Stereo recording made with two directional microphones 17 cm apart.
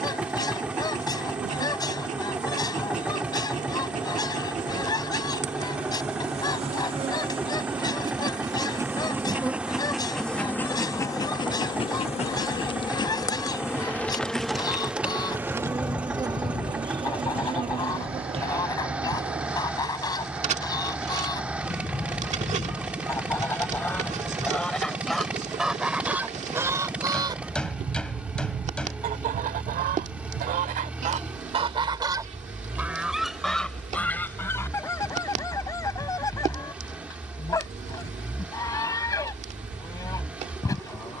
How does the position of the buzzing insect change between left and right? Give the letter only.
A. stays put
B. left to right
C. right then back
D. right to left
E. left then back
E.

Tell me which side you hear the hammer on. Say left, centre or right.
centre.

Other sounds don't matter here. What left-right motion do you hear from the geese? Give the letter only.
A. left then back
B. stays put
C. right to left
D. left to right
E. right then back
E.